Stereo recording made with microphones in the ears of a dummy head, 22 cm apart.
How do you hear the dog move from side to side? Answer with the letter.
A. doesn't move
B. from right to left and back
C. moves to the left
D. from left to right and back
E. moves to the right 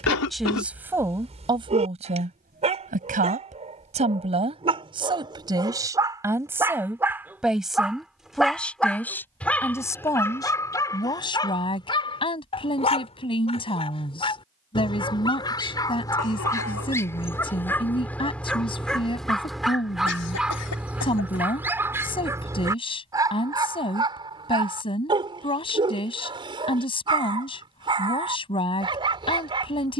B.